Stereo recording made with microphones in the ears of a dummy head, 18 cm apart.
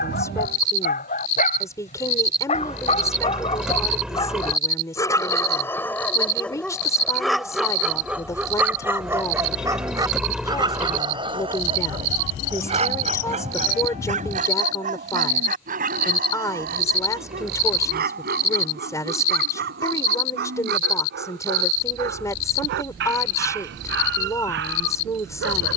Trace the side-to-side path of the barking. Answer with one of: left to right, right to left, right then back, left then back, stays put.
left to right.